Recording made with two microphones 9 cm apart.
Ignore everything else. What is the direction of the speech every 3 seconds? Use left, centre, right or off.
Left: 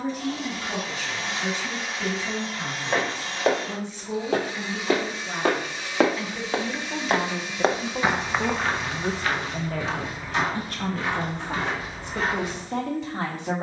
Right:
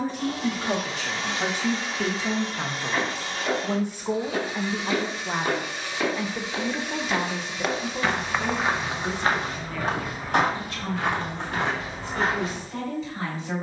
right, right, centre, left, left.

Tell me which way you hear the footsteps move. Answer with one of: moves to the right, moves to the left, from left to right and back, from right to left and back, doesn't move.
moves to the right.